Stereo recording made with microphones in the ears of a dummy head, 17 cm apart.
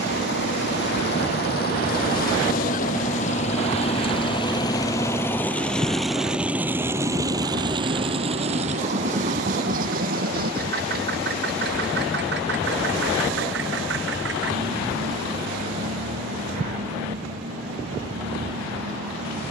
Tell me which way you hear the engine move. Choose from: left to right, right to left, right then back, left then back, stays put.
left to right.